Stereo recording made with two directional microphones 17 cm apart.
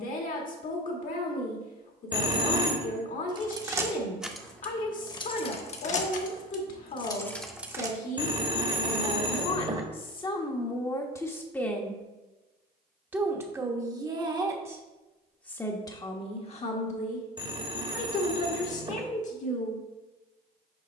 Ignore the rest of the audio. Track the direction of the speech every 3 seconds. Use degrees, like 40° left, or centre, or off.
50° left, 50° left, 50° left, 20° left, 20° right, 30° left, 50° left.